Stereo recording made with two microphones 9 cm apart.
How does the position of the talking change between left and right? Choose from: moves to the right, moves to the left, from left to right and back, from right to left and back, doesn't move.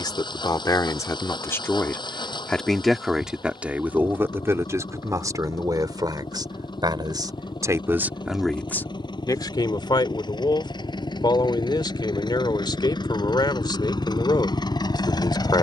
from left to right and back.